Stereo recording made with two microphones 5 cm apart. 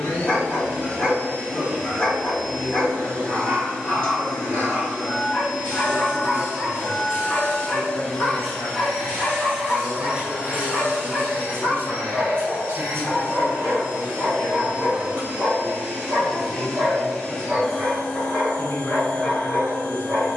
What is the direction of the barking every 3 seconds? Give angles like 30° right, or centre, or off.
20° left, 20° left, 20° left, 20° left, centre, 30° right, 40° right.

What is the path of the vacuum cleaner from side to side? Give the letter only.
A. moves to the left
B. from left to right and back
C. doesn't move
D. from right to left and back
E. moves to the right
B.